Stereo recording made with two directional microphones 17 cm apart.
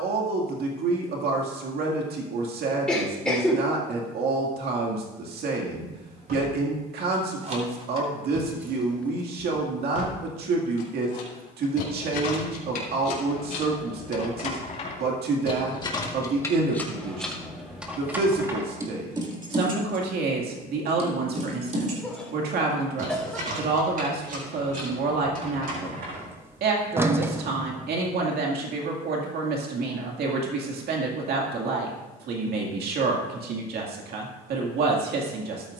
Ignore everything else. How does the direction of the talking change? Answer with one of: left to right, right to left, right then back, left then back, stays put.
stays put.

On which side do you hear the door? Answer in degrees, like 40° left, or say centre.
10° right.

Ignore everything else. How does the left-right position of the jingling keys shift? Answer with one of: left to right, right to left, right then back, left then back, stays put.
left then back.